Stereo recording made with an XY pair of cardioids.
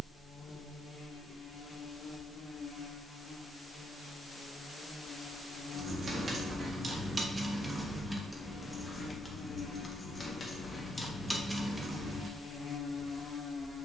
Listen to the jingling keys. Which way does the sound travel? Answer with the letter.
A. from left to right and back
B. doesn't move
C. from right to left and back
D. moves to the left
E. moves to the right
C.